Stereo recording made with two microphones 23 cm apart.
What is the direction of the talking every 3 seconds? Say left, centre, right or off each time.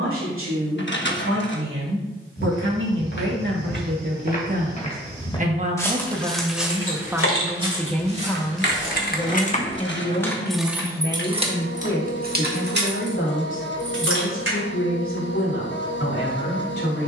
right, right, centre, left, left, left.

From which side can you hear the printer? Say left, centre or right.
left.